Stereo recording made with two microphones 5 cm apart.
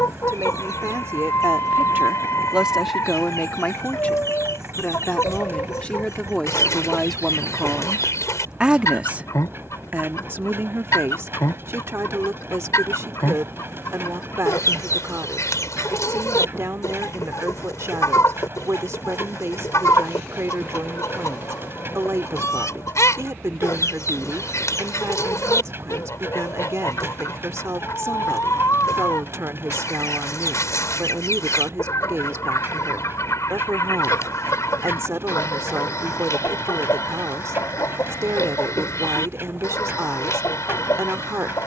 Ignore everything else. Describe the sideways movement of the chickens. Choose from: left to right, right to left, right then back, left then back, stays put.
stays put.